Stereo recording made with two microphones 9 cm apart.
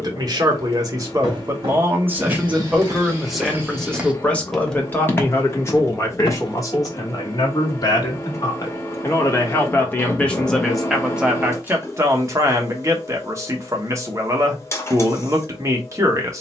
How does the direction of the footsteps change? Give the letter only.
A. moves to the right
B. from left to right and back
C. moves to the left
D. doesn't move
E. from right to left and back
C.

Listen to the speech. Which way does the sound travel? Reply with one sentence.
You can hear the speech move from right to left and back again.